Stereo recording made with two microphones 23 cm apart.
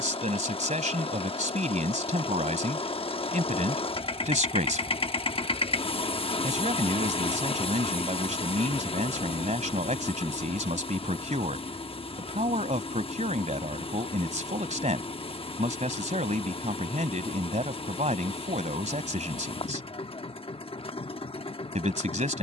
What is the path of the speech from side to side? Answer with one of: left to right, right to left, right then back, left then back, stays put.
stays put.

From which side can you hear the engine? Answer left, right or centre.
left.